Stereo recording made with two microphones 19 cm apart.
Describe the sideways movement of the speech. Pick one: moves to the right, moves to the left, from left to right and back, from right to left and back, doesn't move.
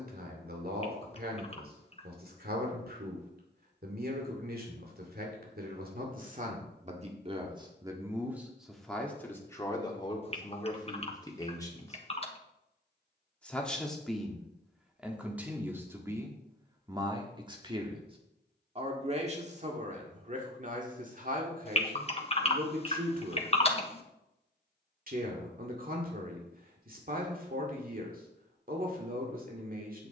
from right to left and back.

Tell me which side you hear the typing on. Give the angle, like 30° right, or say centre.
30° left.